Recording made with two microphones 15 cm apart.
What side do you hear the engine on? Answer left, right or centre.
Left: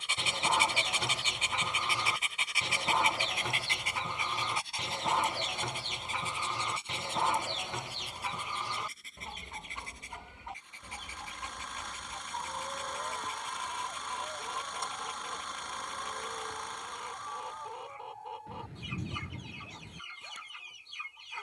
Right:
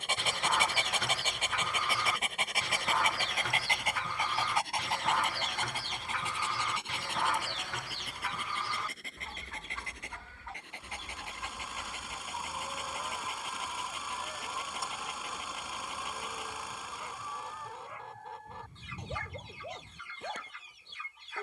centre.